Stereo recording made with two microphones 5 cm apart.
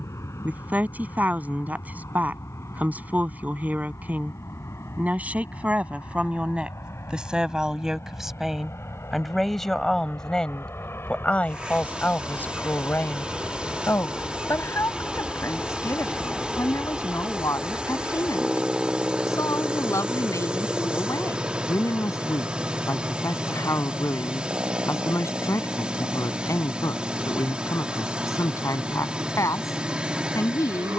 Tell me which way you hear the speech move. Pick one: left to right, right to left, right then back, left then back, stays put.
right to left.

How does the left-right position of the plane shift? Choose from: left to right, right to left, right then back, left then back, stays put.
left to right.